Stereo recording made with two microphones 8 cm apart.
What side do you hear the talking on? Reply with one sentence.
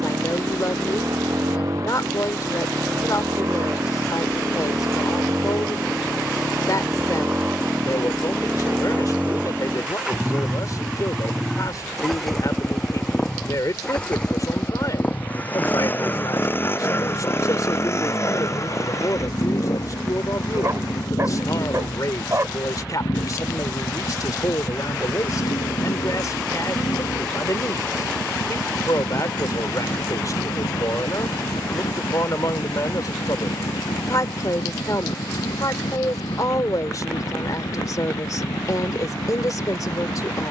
In this clip you hear the talking on the left.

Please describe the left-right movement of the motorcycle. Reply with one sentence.
You can hear the motorcycle travel towards the left.